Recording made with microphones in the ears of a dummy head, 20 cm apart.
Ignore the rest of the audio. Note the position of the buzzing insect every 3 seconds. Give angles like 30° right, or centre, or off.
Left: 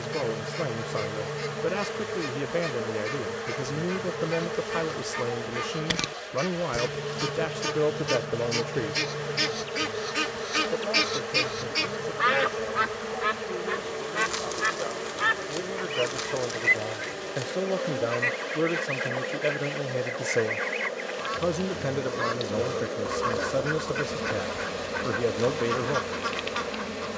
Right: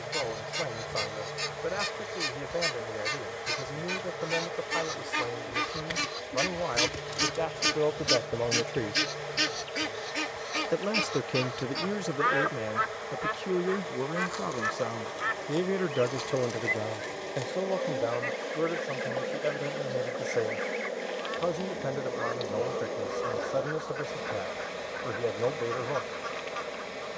60° left, 60° left, 60° left, 60° left, 50° left, 20° left, 10° right, 20° left, 50° left.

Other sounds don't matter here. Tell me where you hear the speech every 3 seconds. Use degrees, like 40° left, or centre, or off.
40° left, 40° left, 20° left, 40° right, 60° right, 20° right, 30° left, 30° left, 30° left.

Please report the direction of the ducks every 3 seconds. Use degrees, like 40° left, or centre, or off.
70° right, 60° right, 40° right, 10° left, 60° left, 70° left, 70° left, 70° left, 70° left.